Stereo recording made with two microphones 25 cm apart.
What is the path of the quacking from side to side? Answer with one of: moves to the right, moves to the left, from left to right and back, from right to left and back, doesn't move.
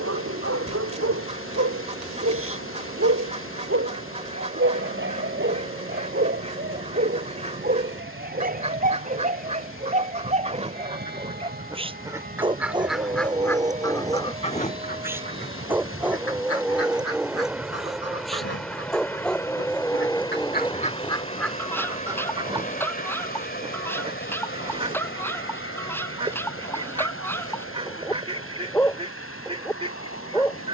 from right to left and back.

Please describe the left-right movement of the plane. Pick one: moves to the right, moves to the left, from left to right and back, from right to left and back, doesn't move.
moves to the left.